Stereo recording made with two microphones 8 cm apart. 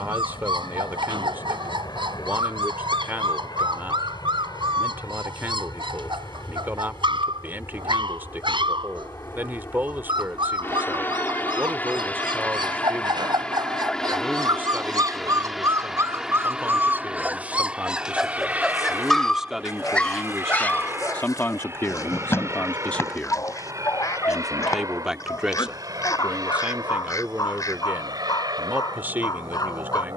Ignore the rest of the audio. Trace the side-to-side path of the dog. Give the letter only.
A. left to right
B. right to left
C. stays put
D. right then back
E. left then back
B.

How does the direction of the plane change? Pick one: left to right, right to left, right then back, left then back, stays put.
left to right.